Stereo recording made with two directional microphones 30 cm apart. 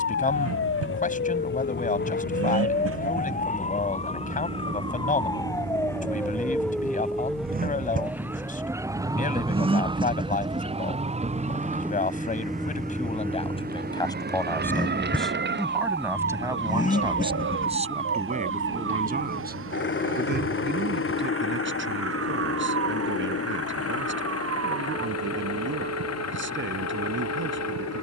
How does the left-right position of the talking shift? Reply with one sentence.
In this clip you hear the talking go from the left side to the right.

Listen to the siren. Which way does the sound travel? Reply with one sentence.
In this clip you hear the siren move to the right.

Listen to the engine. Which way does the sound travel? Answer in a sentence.
In this clip you hear the engine move to the left.